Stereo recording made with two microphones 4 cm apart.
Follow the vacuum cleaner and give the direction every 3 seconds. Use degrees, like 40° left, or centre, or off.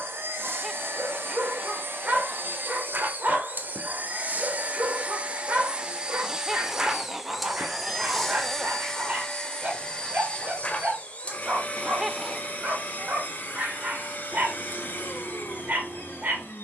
60° right, 40° right, centre, 30° left, 40° left, 50° left.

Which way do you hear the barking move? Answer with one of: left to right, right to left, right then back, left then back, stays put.
stays put.